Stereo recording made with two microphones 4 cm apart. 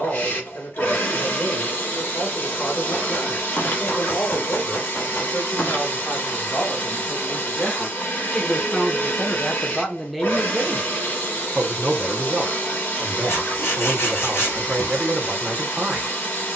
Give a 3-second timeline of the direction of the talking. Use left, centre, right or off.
left, left, left, centre, right, right.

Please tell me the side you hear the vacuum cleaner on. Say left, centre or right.
left.